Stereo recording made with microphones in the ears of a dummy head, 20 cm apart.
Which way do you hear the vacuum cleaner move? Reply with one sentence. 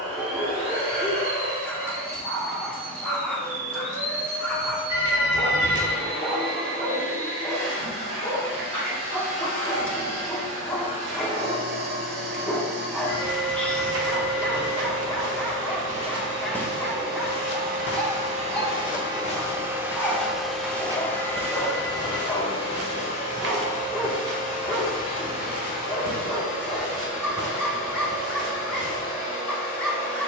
You can hear the vacuum cleaner move from right to left.